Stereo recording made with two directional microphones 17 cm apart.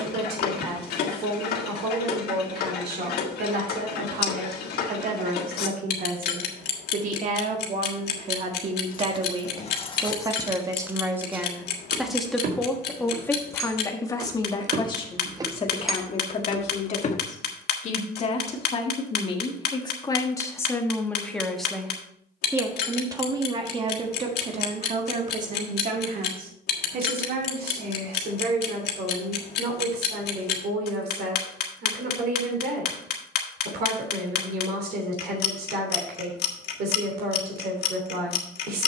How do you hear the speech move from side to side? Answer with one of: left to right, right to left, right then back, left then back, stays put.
left then back.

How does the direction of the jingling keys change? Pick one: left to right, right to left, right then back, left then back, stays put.
right then back.